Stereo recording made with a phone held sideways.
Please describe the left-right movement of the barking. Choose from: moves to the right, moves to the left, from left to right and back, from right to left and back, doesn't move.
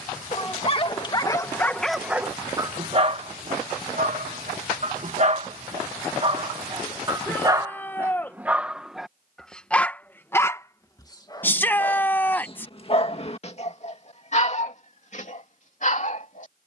from left to right and back.